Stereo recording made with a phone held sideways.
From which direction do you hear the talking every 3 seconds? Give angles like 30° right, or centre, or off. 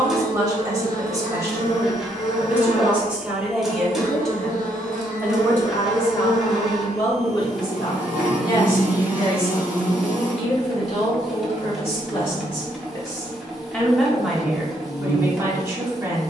20° right, centre, 30° left, 50° left, 20° left, 20° right.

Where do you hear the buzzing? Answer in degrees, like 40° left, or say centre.
70° left.